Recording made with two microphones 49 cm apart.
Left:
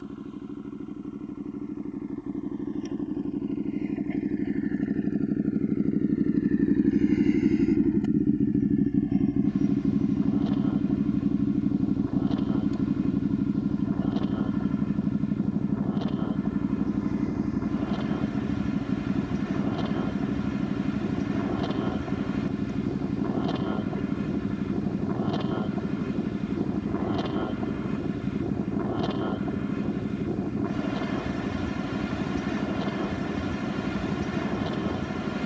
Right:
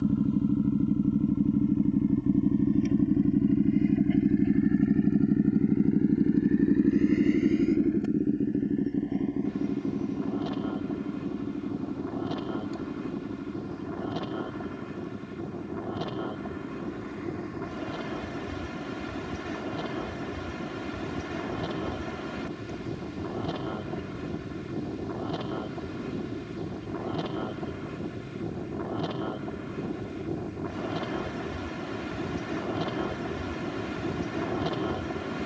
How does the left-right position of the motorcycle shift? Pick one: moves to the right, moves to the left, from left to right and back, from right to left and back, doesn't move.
moves to the left.